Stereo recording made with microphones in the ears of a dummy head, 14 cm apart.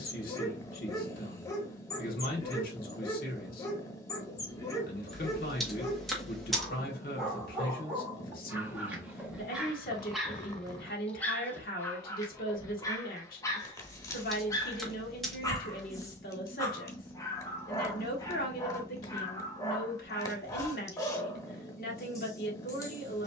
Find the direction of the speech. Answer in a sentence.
In this clip you hear the speech on the left.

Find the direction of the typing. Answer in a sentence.
In this clip you hear the typing in the centre.